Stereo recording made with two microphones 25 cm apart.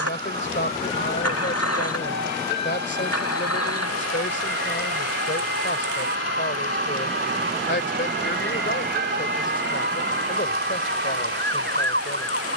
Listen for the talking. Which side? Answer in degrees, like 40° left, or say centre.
50° left.